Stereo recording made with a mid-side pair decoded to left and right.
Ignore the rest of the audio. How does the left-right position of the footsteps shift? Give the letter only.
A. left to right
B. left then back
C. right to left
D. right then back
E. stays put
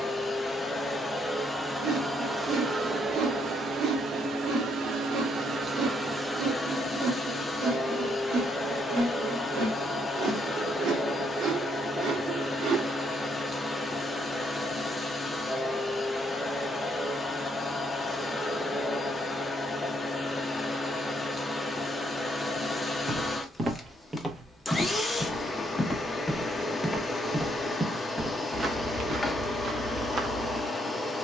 B.